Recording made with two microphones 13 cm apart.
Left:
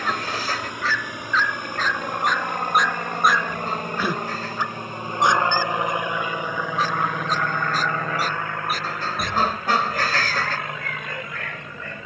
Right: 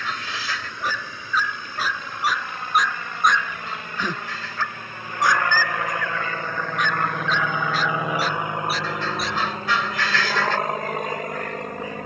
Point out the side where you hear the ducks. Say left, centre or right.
left.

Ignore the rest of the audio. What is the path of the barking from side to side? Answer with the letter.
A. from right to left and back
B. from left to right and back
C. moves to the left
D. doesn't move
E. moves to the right
C.